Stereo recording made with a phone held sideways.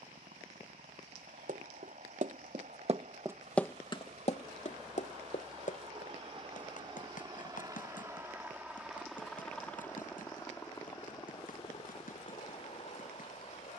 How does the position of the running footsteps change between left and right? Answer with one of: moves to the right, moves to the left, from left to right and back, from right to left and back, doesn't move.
moves to the left.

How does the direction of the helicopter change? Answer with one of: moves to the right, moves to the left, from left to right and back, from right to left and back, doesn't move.
moves to the left.